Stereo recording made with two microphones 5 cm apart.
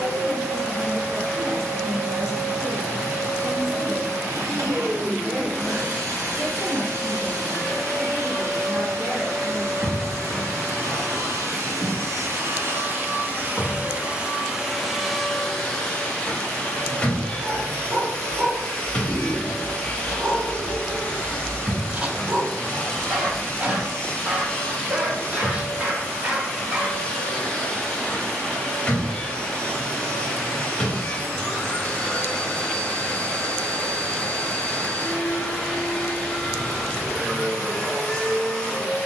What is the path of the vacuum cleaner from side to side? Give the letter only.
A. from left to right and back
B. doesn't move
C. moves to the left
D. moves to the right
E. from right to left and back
C.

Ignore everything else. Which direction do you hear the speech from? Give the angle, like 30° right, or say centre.
20° right.